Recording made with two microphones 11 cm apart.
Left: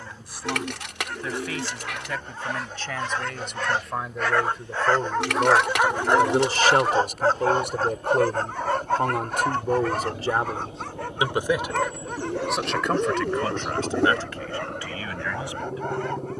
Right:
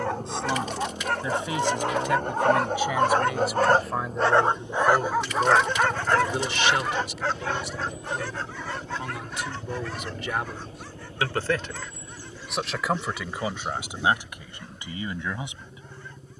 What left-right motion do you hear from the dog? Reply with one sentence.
In this clip you hear the dog move to the left.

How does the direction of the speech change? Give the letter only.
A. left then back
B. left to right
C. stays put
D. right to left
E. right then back
A.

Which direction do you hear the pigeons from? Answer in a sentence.
In this clip you hear the pigeons on the left.